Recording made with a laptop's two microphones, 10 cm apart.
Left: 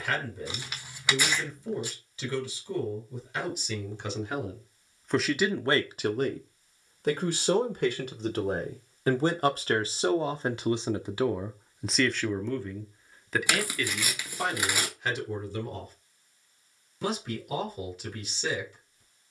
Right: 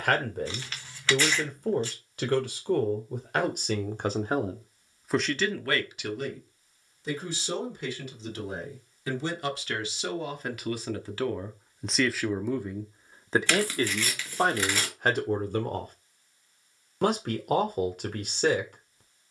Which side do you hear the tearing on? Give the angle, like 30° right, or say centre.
10° left.